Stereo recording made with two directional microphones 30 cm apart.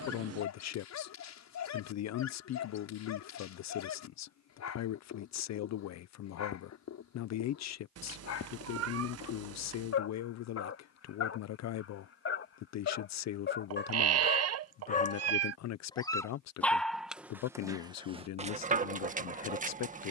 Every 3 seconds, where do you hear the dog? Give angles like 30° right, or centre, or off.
60° left, 60° left, 60° left, 50° left, 40° left, centre, 20° right.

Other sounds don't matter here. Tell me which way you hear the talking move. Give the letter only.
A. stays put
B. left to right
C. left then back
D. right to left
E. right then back
A.